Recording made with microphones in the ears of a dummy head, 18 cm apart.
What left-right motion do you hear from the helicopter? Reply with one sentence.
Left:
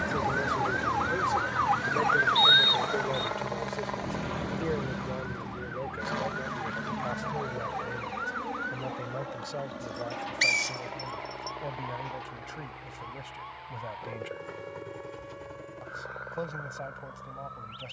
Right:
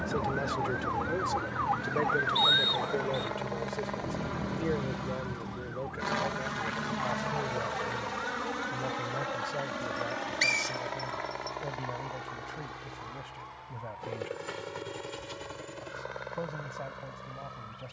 You can hear the helicopter move to the right.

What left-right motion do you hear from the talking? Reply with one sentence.
You can hear the talking go from the right side to the left.